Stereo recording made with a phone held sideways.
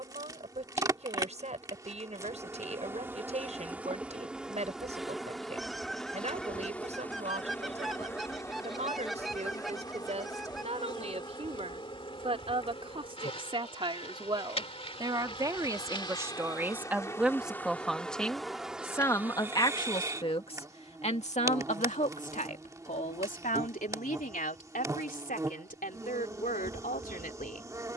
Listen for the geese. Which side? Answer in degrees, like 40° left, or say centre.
centre.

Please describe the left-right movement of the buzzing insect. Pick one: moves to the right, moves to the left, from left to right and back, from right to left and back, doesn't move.
from right to left and back.